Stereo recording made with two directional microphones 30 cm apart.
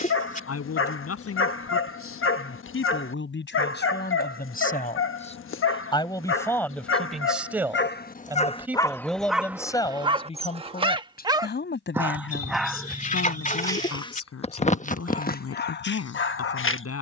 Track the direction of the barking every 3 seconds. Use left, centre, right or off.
left, left, left, centre, centre, left.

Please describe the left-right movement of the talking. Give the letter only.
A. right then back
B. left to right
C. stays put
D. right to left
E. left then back
A.